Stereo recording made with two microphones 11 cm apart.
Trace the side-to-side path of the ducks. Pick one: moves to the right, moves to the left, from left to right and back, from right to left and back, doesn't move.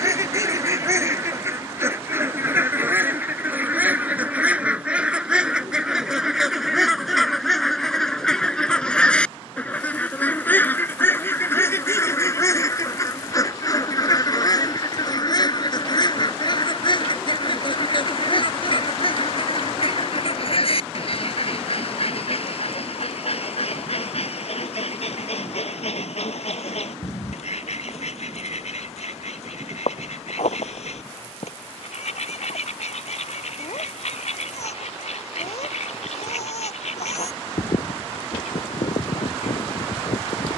moves to the left.